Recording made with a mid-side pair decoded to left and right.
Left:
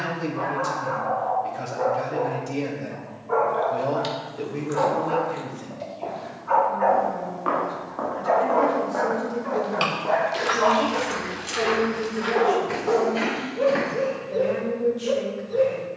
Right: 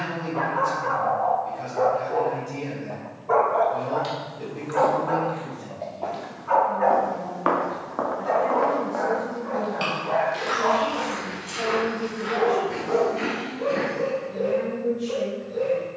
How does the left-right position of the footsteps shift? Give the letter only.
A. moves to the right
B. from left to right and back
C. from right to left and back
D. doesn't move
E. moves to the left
E.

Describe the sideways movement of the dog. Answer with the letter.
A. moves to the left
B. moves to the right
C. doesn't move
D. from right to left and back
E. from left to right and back
A.